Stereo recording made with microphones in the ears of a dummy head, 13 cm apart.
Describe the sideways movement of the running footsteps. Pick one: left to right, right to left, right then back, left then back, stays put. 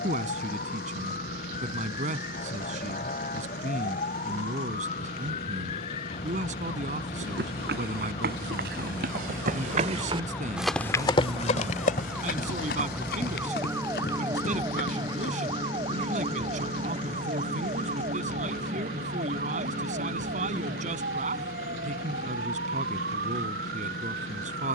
right to left.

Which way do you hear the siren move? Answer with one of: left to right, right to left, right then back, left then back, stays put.
left to right.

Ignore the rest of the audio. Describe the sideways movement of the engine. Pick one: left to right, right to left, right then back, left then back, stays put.
stays put.